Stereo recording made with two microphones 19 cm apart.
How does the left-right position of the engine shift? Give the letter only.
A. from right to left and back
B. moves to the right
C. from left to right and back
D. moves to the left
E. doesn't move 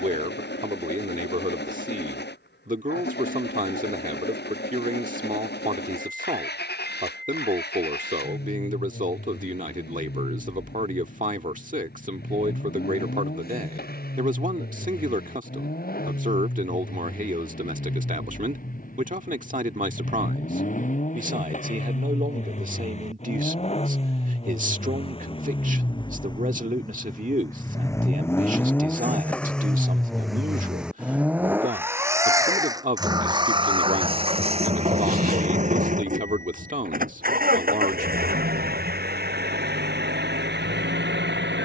B.